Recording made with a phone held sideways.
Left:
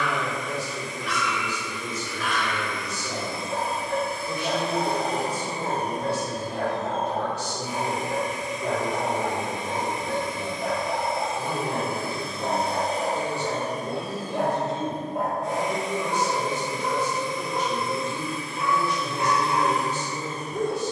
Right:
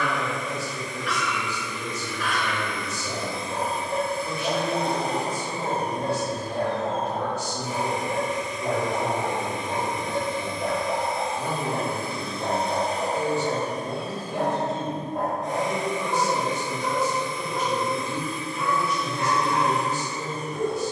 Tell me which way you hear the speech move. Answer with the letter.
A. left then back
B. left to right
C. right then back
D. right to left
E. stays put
E.